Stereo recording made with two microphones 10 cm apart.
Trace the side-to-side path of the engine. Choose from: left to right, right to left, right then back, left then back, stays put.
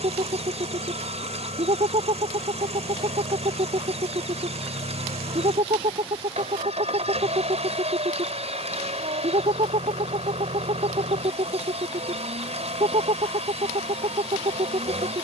stays put.